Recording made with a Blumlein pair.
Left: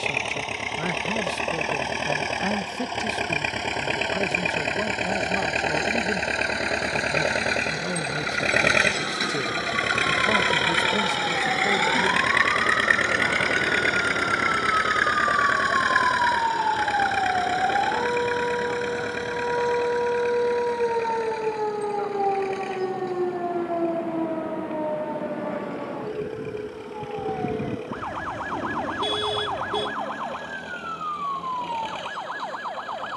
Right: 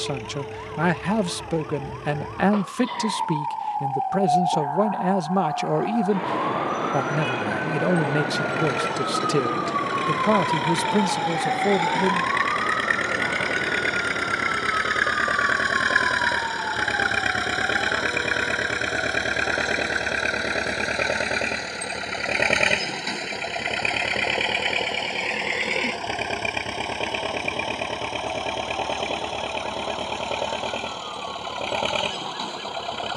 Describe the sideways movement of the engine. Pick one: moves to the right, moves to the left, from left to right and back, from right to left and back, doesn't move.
moves to the right.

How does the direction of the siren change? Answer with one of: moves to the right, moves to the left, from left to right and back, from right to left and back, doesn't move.
moves to the left.